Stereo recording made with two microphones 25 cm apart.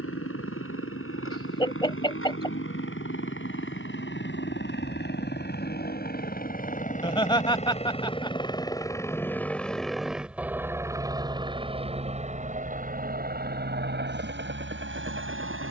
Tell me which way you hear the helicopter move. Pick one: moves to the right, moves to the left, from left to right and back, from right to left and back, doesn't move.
moves to the right.